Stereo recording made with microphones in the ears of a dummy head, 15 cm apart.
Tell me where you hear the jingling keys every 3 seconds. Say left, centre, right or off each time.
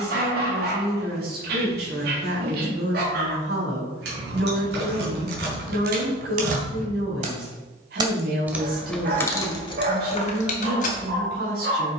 off, right, right, left.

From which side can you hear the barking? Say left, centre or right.
right.